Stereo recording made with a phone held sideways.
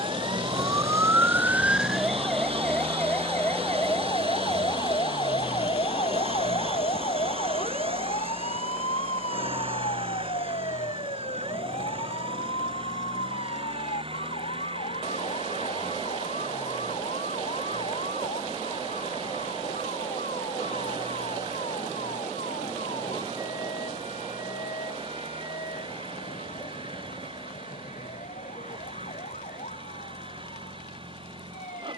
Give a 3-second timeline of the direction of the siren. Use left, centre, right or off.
centre, left, left, left, left, left, left, left, left, left, left.